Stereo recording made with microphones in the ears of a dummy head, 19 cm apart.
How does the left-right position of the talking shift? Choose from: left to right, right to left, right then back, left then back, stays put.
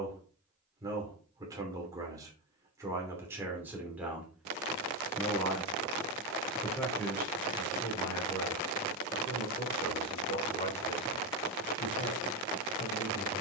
right to left.